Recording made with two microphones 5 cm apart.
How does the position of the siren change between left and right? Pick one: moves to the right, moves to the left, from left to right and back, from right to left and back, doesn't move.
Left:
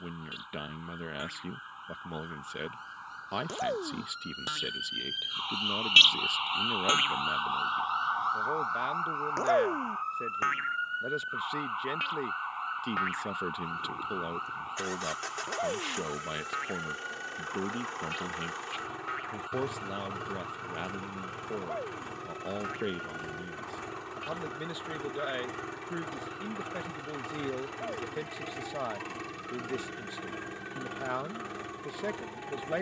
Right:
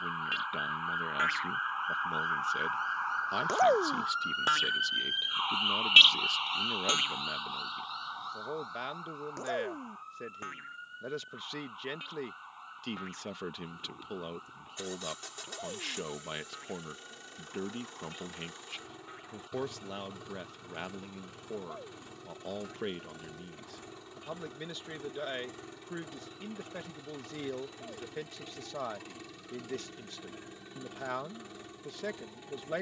moves to the left.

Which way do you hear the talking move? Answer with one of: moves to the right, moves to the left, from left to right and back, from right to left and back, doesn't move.
doesn't move.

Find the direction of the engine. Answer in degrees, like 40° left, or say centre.
70° left.